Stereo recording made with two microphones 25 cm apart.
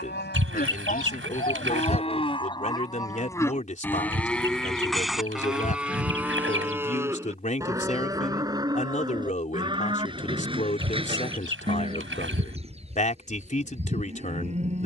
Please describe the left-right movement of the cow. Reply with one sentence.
You can hear the cow move to the right.